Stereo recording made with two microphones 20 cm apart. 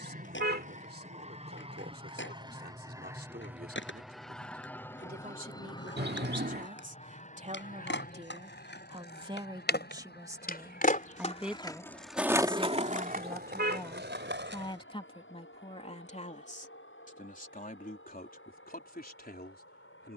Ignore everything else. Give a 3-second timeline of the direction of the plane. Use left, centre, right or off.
right, centre, left, left, left, left, left.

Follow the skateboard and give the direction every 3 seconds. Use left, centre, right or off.
left, left, left, left, right, off, off.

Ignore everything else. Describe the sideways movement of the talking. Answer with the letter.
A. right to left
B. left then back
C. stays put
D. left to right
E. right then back
A.